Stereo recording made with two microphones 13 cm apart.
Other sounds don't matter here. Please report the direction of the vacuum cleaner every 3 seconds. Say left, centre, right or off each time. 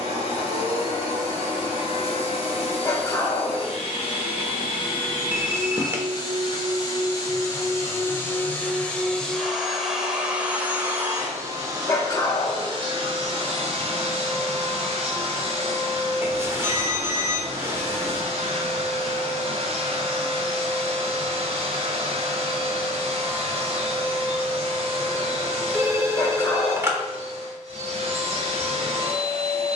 left, left, left, centre, right, right, right, right, right, right.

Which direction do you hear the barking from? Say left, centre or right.
left.